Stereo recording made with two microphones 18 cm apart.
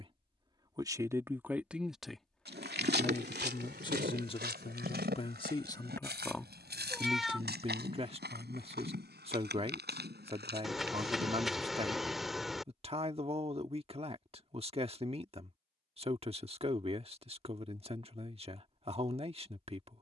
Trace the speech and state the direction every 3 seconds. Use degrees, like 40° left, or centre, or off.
10° right, 30° left, 20° right, 30° right, 30° right, 30° right, 30° right.